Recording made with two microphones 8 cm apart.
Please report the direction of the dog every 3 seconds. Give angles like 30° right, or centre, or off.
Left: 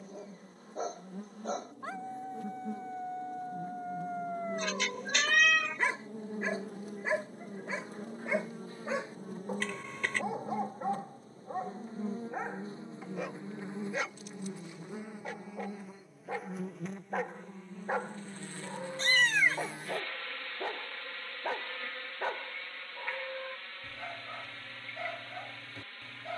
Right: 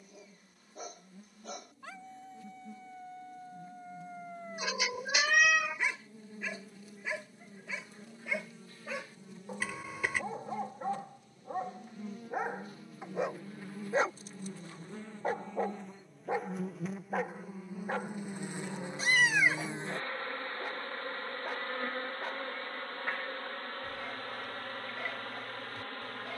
40° left, 40° left, 40° left, 10° left, 30° right, 20° right, 30° left, 30° left, 30° left.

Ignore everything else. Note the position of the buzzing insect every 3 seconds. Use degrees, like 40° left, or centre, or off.
70° left, 60° left, 50° left, 40° left, 30° left, centre, 20° right, 40° right, 50° right.